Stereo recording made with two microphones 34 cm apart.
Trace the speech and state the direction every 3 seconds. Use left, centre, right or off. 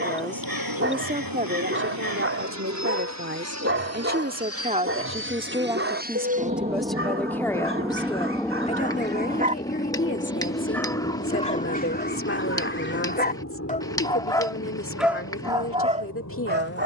right, right, centre, left, left, left.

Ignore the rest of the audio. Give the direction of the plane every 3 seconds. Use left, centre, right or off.
right, right, centre, left, left, left.